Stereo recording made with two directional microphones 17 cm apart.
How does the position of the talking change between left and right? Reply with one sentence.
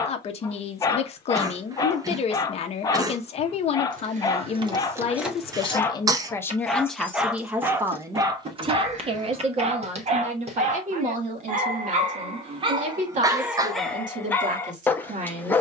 You can hear the talking travel towards the right.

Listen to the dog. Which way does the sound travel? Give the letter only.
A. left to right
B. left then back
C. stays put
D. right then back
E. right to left
D.